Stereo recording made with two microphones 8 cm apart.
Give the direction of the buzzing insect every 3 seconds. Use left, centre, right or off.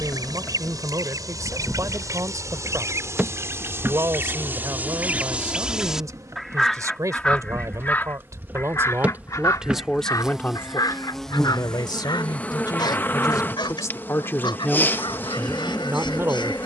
centre, right, right, centre, left, left.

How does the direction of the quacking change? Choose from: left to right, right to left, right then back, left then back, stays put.
right to left.